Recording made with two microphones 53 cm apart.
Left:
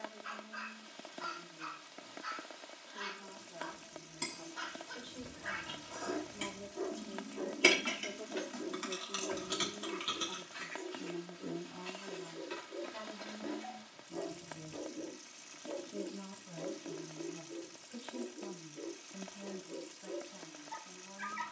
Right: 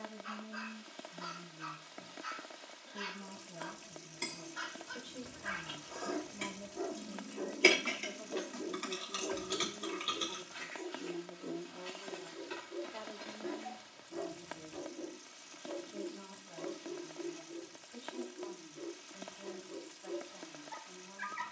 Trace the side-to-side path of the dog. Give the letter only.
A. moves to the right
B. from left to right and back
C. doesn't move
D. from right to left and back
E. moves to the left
E.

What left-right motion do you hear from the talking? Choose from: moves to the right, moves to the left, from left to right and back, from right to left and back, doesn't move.
moves to the left.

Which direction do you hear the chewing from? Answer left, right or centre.
left.